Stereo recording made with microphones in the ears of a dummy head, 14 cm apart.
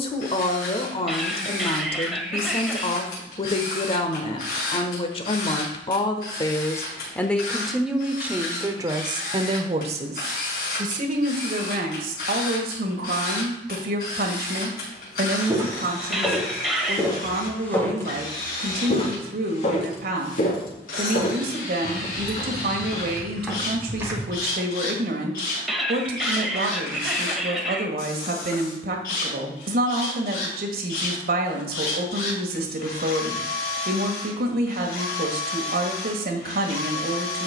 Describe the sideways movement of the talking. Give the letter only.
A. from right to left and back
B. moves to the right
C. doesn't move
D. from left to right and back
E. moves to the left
B.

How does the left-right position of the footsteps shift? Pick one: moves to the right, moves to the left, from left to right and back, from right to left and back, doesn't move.
from right to left and back.